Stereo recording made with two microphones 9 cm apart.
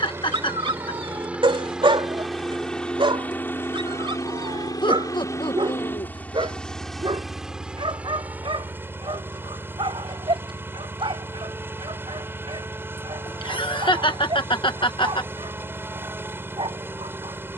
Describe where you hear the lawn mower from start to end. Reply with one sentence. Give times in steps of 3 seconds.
In this clip you hear the lawn mower in the centre from 0 s, on the left from 3 s, in the centre from 6 s and on the right from 9 s.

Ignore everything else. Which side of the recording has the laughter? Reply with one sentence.
In this clip you hear the laughter on the left.